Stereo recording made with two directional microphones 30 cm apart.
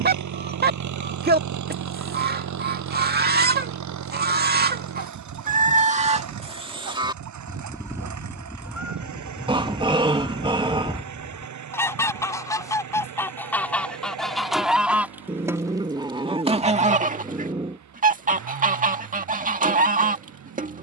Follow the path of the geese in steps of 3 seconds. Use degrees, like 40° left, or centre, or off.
30° right, 30° right, 10° right, centre, centre, 20° right, 30° right.